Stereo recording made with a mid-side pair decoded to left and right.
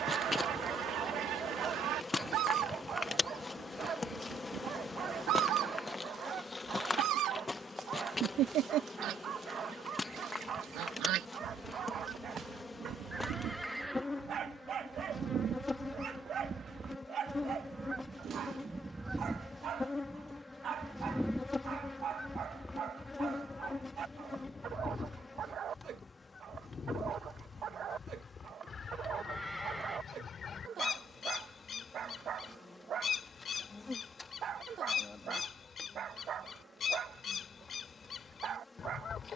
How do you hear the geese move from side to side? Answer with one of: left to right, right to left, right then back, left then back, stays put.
right to left.